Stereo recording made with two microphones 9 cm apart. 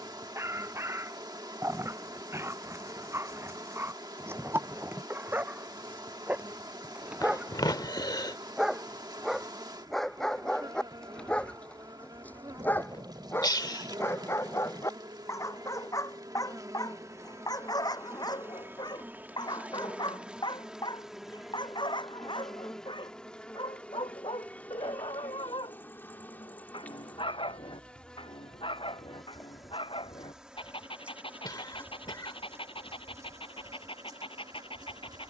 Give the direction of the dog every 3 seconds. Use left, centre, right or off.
right, right, centre, centre, left, left, left, left, left, left, left, left.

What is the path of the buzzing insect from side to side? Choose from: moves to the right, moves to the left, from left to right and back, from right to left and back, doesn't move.
from right to left and back.